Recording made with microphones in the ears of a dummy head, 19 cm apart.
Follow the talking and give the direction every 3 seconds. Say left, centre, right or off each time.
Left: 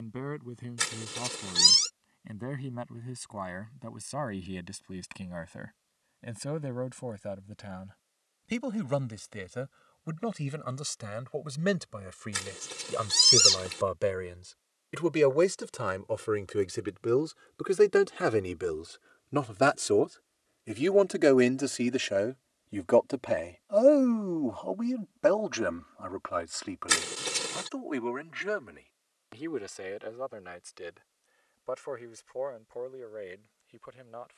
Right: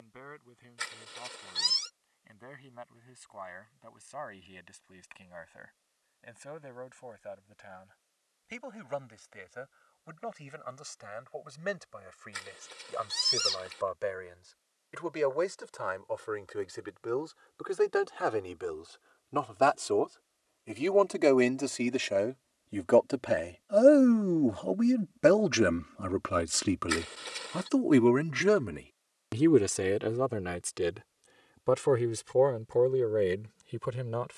left, left, left, left, left, left, left, centre, right, right, right, right.